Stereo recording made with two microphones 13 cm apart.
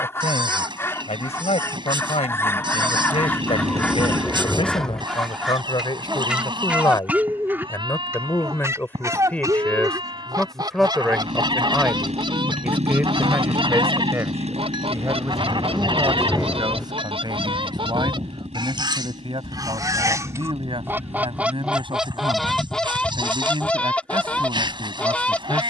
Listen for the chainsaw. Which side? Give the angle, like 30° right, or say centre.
50° right.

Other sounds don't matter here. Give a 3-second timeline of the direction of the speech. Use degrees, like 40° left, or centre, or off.
50° left, 40° left, 20° left, centre, 20° right, 30° right, 40° right, 40° right, 40° right.